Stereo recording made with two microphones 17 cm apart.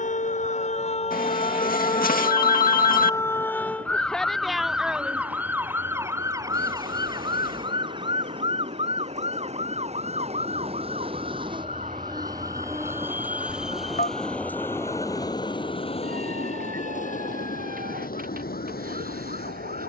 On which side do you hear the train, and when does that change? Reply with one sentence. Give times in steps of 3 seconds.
In this clip you hear the train on the right from 0 s, in the centre from 12 s and on the left from 15 s.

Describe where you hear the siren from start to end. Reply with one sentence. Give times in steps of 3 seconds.
In this clip you hear the siren on the left from 0 s, in the centre from 3 s and on the right from 6 s.